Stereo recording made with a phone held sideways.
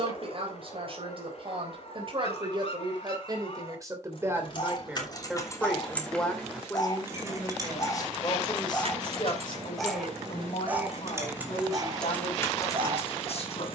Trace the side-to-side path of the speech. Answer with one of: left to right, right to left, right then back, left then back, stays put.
right to left.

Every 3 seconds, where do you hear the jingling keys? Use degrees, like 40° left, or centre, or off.
off, 30° left, 30° right, 30° right, 30° left.